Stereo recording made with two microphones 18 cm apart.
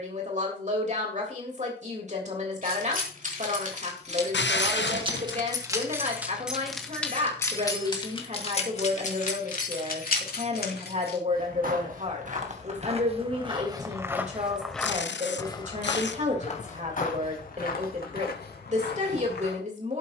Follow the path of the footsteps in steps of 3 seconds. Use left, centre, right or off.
off, off, off, right, right, left, left.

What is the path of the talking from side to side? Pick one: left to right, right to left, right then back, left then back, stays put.
stays put.